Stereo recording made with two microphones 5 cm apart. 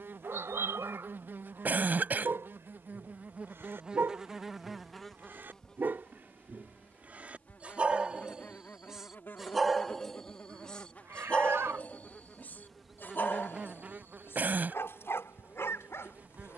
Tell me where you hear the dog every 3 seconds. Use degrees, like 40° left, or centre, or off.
60° right, 50° right, 30° right, 20° left, 50° left, 60° left.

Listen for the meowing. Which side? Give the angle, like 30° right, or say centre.
60° right.